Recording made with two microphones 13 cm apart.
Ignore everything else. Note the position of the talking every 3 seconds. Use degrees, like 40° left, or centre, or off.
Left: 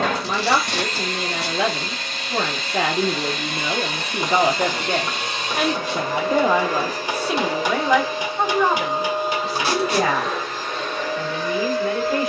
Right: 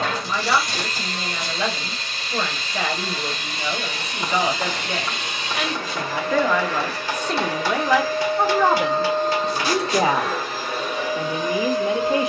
70° left, 50° left, 10° left, 20° right.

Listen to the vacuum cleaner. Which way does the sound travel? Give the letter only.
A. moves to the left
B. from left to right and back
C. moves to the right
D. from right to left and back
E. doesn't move
C.